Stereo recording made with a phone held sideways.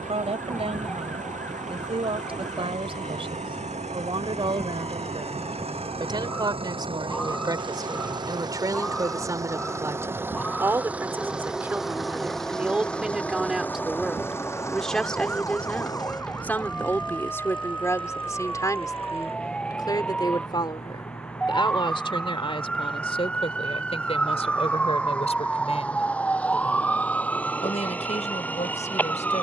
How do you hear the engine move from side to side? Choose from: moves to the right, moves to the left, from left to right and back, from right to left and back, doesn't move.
moves to the left.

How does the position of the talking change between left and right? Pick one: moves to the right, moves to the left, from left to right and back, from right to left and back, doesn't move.
moves to the left.